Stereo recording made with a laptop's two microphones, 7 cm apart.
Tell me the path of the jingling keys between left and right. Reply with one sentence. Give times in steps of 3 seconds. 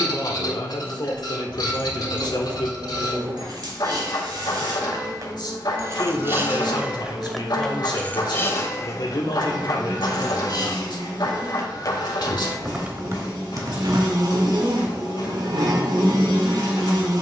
In this clip you hear the jingling keys on the right from 0 s, in the centre from 6 s, on the left from 9 s, on the right from 12 s and not at all from 15 s.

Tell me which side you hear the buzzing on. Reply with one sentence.
In this clip you hear the buzzing on the right.